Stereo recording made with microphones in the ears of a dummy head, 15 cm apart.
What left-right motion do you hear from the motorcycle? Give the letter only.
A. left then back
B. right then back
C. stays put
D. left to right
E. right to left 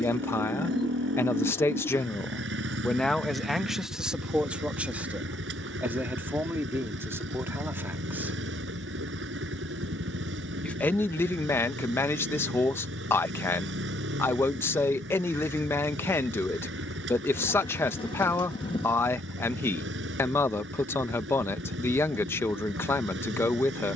C.